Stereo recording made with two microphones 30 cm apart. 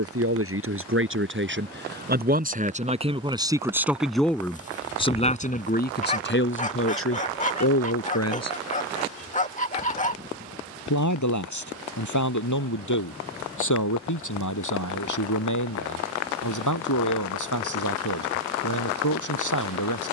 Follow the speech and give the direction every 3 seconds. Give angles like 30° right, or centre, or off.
40° right, 10° left, 50° left, 70° left, 80° left, 80° left, 80° left.